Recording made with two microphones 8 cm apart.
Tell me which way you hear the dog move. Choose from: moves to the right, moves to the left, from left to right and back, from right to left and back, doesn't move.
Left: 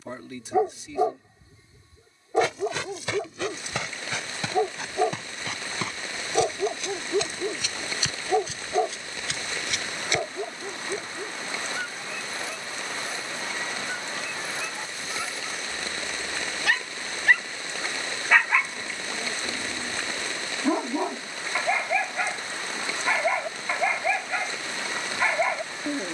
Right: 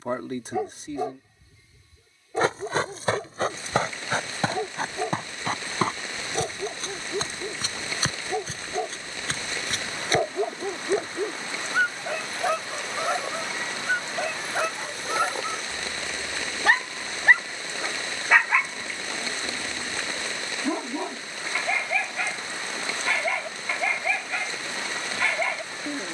from left to right and back.